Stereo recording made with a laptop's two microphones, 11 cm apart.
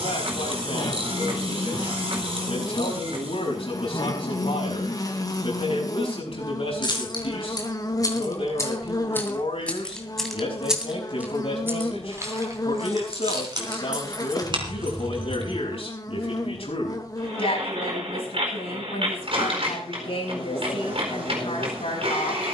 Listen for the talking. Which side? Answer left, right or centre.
left.